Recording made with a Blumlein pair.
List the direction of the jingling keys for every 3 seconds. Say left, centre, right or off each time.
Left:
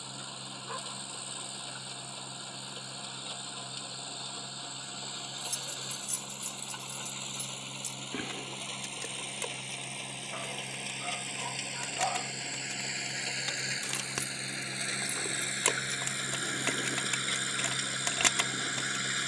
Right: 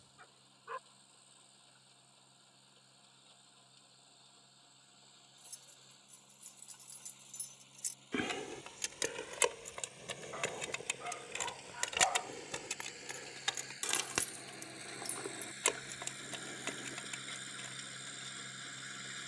off, off, centre, right, centre, left, left.